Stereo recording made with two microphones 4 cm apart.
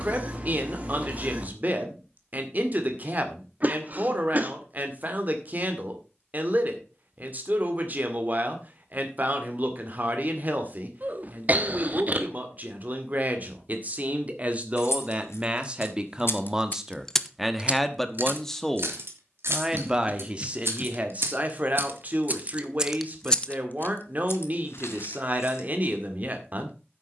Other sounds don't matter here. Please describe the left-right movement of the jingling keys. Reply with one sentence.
You can hear the jingling keys go right and come back.